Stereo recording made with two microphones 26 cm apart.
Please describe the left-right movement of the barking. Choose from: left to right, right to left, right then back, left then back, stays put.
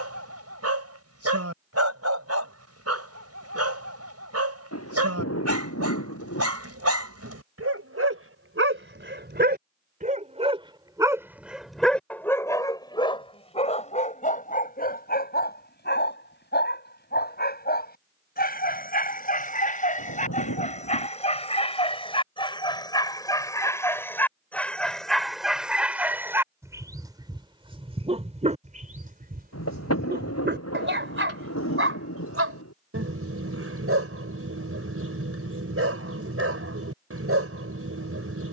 left then back.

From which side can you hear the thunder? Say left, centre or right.
left.